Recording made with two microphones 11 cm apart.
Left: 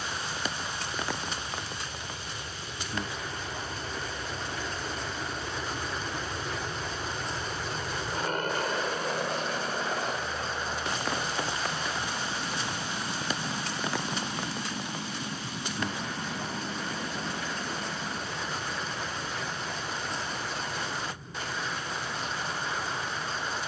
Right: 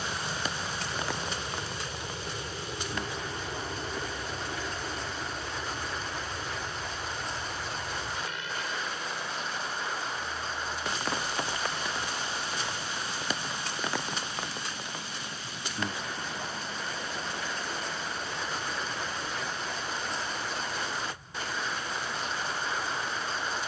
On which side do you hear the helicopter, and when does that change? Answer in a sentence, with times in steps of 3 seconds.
You can hear the helicopter on the right from 0 s, in the centre from 3 s and on the left from 6 s.